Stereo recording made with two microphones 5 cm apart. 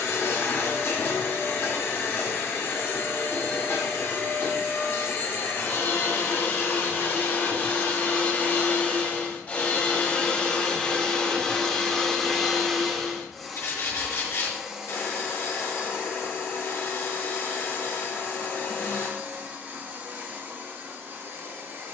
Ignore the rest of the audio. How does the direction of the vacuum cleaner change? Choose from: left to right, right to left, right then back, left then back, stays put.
left to right.